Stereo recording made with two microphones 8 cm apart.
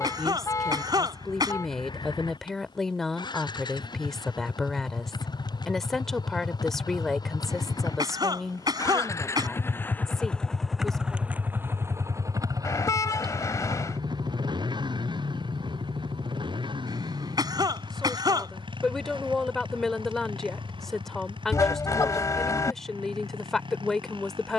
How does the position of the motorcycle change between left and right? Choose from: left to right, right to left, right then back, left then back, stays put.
left to right.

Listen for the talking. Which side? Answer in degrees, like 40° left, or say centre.
10° left.